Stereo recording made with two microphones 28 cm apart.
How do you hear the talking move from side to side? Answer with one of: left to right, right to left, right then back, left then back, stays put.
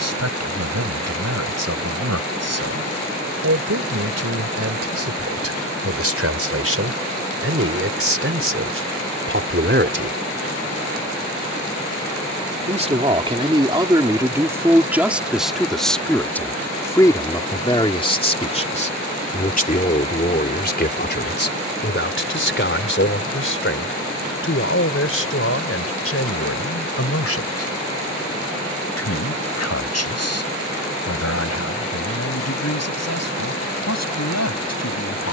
right to left.